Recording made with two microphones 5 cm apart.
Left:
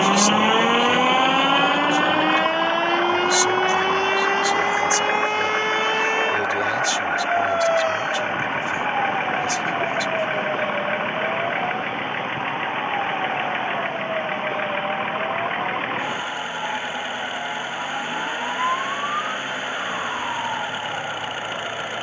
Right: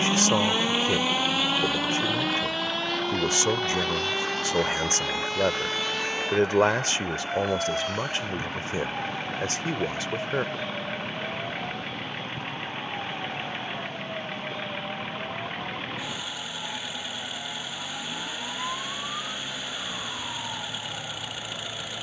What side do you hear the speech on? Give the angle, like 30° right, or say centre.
40° right.